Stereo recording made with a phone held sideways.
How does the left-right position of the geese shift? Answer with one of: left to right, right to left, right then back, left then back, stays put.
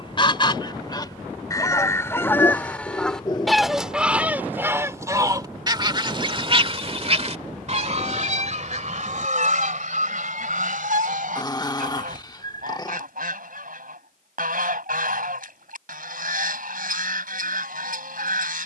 left to right.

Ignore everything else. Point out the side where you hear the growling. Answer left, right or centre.
left.